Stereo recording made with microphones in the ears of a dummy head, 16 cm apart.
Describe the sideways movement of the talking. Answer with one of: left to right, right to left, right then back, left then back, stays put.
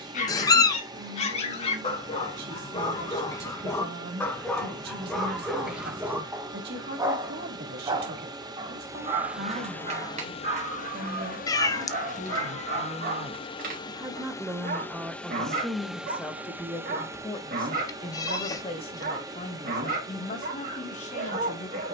right to left.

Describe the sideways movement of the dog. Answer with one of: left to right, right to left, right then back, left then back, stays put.
left to right.